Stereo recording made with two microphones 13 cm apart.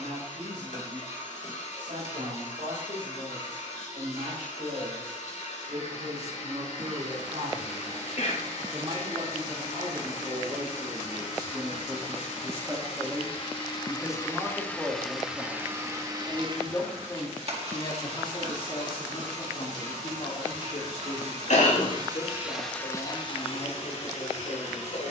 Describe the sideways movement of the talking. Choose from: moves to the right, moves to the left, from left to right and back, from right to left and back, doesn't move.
moves to the left.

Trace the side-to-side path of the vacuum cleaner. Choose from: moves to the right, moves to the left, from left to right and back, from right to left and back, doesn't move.
from left to right and back.